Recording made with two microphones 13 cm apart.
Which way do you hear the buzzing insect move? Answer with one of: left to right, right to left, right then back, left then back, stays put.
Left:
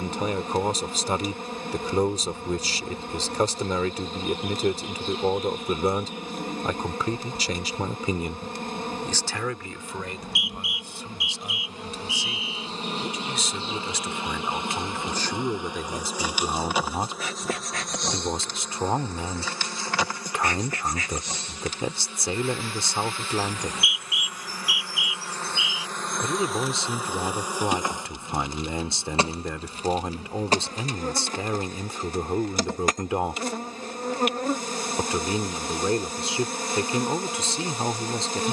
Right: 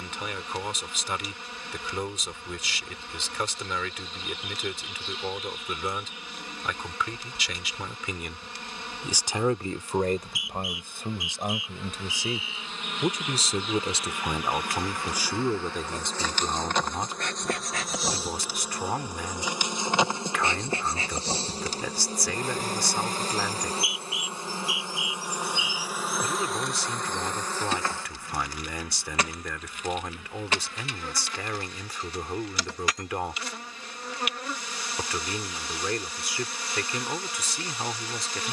right then back.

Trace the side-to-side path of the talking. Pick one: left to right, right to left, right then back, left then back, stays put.
right then back.